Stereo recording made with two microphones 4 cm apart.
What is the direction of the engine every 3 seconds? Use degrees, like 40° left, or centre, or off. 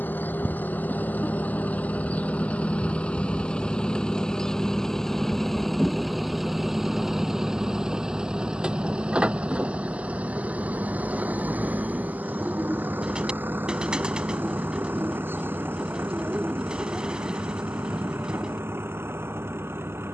40° left, 10° left, 10° right, 30° right, 50° right, 50° right, 60° right.